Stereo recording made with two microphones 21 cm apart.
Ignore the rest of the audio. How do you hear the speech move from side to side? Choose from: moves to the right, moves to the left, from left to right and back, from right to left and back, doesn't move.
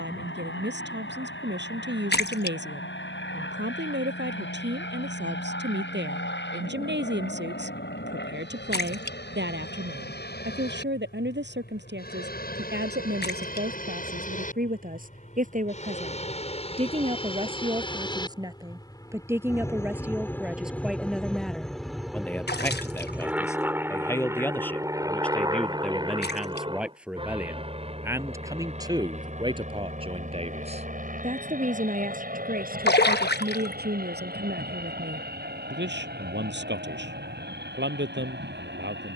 from right to left and back.